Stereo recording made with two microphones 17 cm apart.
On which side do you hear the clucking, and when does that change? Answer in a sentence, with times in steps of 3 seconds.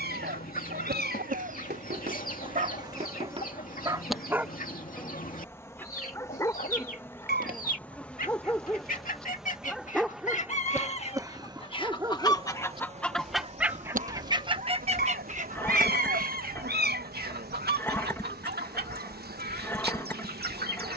In this clip you hear the clucking on the left from 0 s, in the centre from 12 s and on the right from 15 s.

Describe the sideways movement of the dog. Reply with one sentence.
In this clip you hear the dog go left and come back.